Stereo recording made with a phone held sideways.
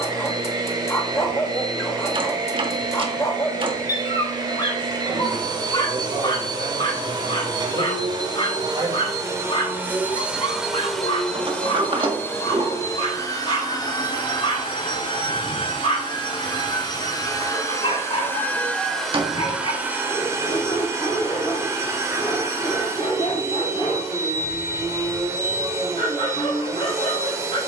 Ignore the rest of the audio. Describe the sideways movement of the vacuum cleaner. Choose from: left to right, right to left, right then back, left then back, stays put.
left then back.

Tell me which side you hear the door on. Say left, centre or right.
right.